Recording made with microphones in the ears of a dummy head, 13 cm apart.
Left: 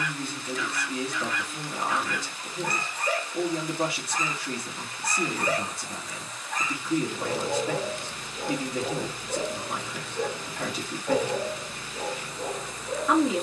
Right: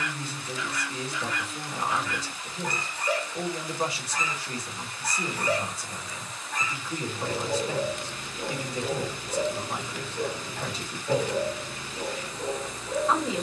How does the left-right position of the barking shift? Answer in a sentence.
You can hear the barking stay put.